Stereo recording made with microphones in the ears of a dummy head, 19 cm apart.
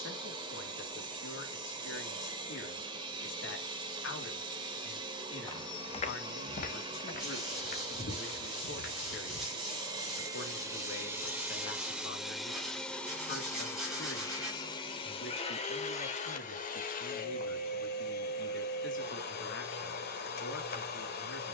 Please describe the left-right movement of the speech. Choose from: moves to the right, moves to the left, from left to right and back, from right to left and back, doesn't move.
doesn't move.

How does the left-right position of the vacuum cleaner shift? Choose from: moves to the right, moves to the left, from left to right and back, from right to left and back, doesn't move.
moves to the left.